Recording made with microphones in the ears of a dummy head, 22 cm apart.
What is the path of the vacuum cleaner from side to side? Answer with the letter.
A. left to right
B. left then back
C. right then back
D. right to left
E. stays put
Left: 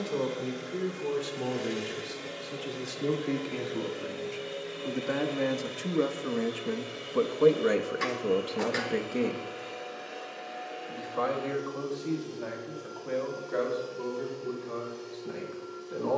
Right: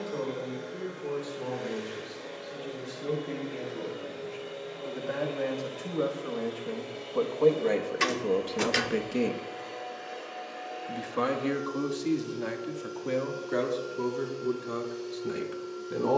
A.